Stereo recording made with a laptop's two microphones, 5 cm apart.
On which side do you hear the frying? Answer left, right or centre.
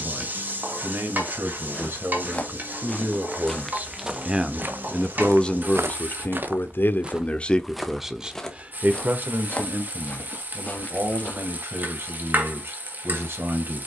right.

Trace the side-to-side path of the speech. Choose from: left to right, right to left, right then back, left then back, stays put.
left then back.